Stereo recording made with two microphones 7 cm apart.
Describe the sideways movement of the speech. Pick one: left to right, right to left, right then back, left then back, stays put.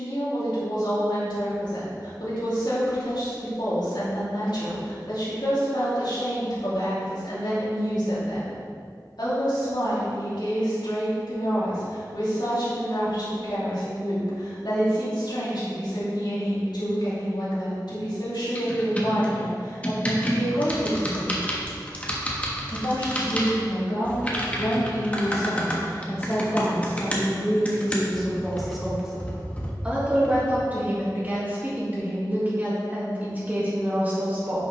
left to right.